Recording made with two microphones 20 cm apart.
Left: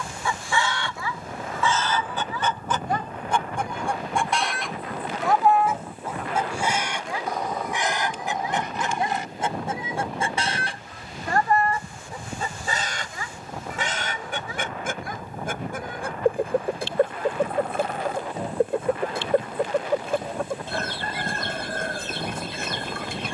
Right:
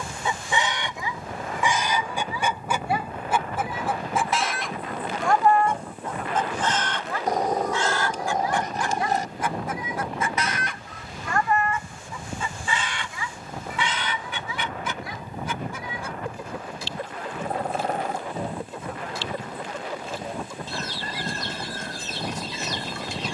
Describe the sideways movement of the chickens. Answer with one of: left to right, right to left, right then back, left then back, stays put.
right to left.